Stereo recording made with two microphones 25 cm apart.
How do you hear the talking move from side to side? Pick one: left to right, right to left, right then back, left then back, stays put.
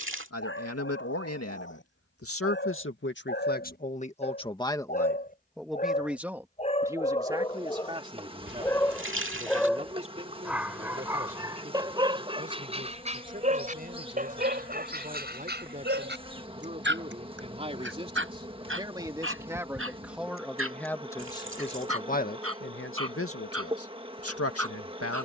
right then back.